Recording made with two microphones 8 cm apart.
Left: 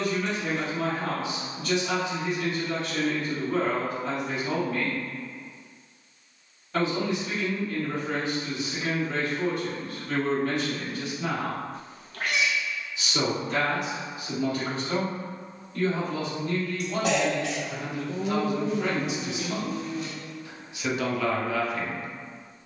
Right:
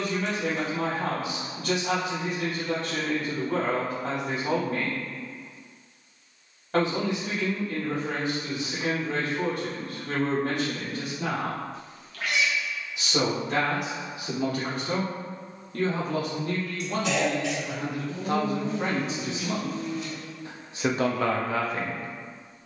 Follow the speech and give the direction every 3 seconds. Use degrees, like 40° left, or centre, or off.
70° right, 70° right, 70° right, 70° right, 70° right, 60° right, 40° right, 40° right.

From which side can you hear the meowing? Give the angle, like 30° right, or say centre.
50° left.